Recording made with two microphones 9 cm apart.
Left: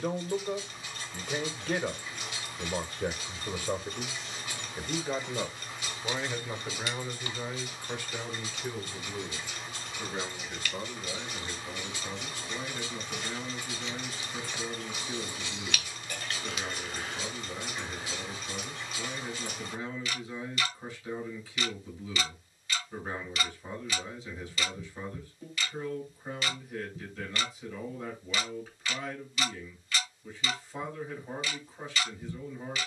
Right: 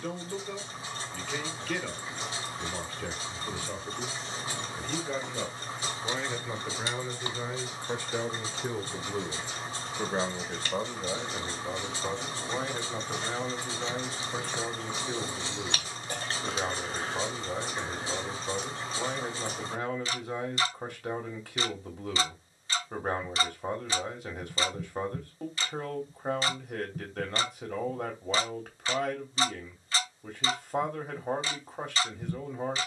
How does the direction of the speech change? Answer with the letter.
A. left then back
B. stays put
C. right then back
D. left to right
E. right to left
D.